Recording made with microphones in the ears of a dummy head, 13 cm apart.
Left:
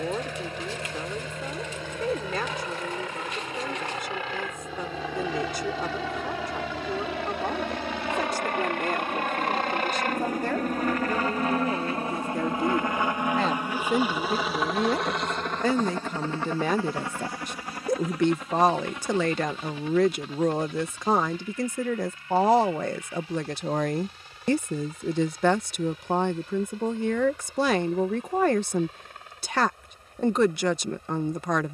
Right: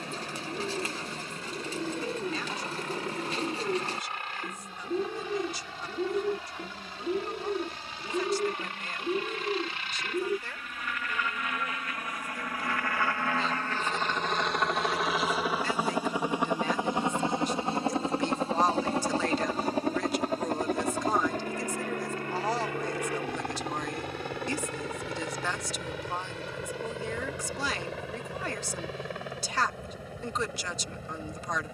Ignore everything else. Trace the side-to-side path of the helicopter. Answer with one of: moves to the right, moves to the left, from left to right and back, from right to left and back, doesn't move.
moves to the right.